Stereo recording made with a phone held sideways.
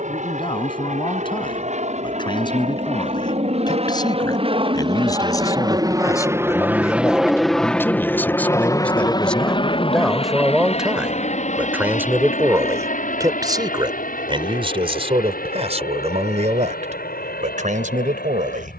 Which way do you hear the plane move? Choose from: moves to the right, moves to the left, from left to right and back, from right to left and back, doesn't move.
moves to the left.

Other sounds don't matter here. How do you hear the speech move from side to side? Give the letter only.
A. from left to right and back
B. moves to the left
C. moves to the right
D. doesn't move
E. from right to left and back
C.